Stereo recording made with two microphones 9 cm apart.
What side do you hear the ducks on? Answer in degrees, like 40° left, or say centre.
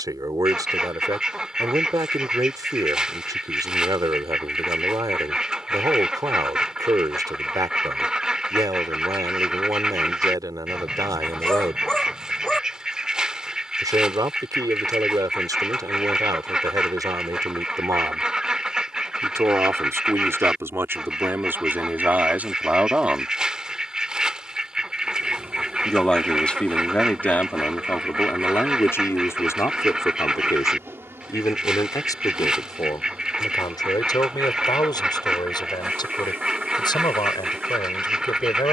10° right.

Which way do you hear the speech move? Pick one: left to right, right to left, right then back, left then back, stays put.
right to left.